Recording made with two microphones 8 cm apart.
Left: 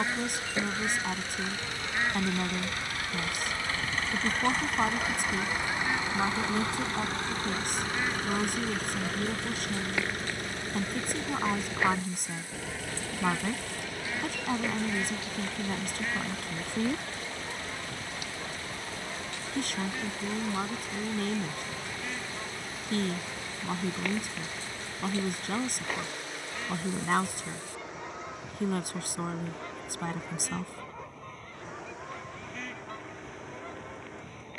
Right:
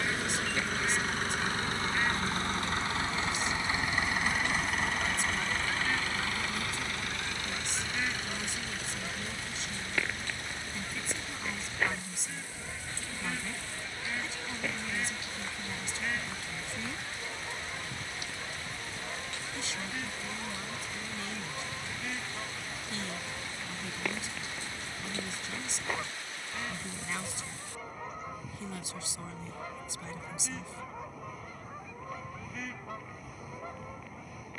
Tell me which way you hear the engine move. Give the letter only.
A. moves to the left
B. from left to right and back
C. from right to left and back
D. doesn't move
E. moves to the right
A.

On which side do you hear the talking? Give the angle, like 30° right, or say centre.
50° left.